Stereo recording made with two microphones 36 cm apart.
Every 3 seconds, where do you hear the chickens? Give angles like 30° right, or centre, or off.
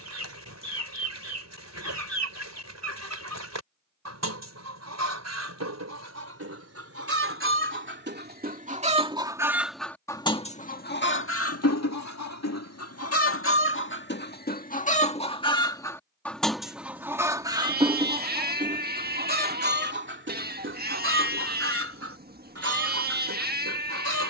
50° right, 50° right, 40° right, 20° left, 40° left, centre, 30° right, 40° right.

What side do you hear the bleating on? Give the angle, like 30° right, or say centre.
30° right.